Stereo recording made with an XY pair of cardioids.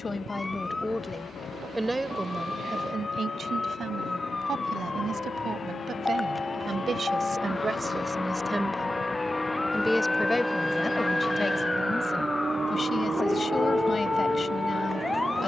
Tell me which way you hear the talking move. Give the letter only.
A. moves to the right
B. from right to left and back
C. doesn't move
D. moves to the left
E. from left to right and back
E.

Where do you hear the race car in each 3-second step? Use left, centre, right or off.
left, left, left, centre, right.